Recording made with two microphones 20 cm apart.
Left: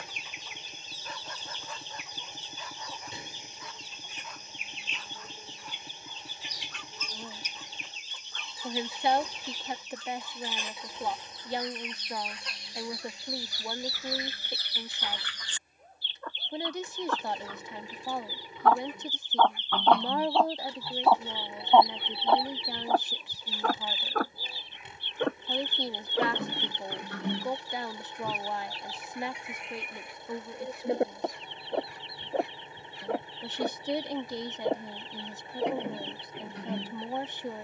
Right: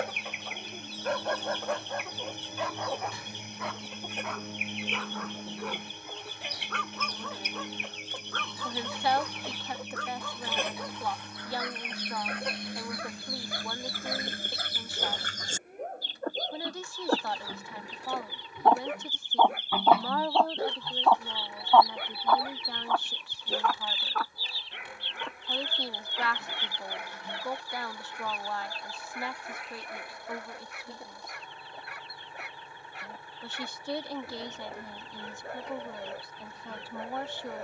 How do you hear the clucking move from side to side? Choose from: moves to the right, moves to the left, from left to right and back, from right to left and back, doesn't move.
moves to the left.